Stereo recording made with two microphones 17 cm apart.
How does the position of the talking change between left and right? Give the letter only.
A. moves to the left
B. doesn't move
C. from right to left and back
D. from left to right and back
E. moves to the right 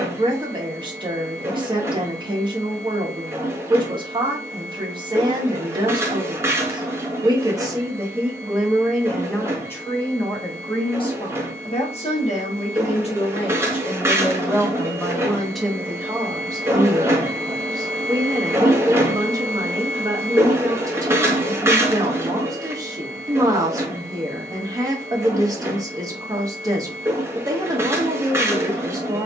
C.